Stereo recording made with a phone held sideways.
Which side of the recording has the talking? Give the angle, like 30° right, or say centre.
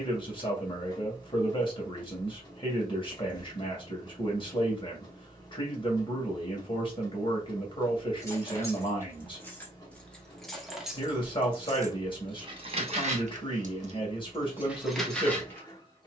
30° left.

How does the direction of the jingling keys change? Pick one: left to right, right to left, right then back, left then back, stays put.
right then back.